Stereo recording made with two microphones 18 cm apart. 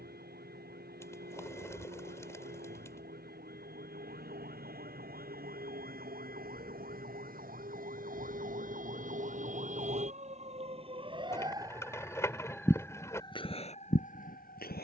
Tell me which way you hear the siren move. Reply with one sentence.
In this clip you hear the siren go from the right side to the left.